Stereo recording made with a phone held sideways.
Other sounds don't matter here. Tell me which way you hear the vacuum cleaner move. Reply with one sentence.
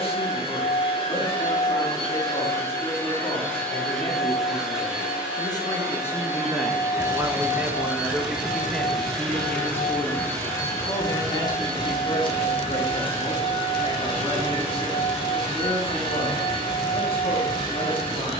You can hear the vacuum cleaner go right and come back.